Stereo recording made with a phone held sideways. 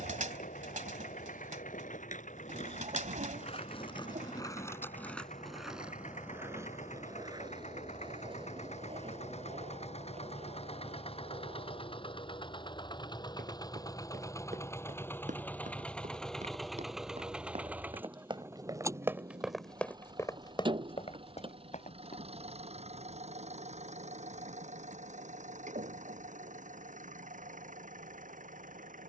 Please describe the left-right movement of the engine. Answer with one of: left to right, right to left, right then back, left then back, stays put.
left to right.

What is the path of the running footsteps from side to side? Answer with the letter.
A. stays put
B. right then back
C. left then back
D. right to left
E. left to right
D.